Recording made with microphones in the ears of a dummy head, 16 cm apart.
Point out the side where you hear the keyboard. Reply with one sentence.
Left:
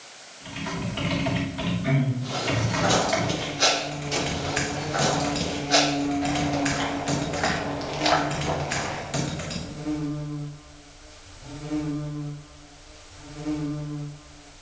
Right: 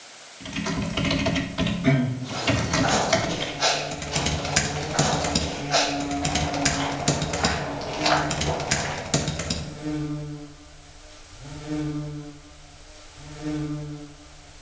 You can hear the keyboard on the right.